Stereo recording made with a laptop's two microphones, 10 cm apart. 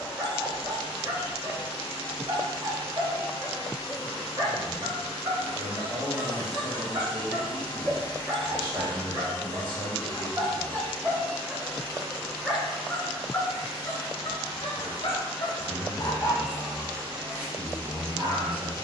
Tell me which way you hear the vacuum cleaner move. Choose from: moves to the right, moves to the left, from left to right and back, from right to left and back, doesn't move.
moves to the right.